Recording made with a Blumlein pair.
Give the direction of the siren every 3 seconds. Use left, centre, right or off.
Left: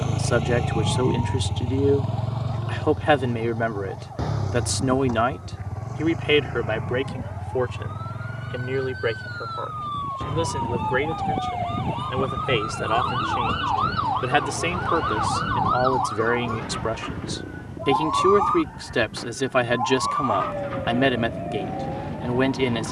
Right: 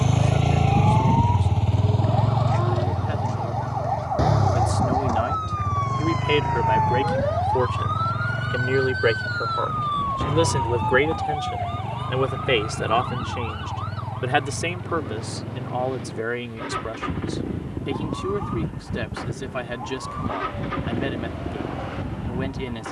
right, right, right, centre, left, left, left, left.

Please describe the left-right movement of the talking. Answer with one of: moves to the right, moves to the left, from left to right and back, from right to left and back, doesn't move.
from left to right and back.